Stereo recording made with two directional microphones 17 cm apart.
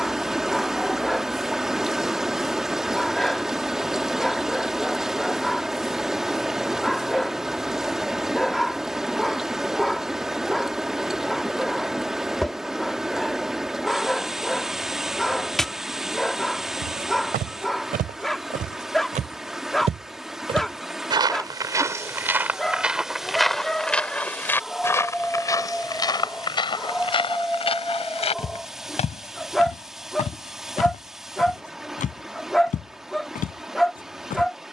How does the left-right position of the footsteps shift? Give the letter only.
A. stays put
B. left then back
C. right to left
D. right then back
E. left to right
C.